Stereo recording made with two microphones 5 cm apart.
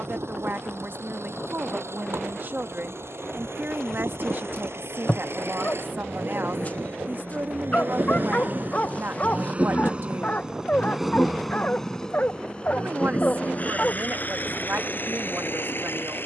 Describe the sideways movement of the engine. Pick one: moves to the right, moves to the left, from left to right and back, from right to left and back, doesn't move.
moves to the left.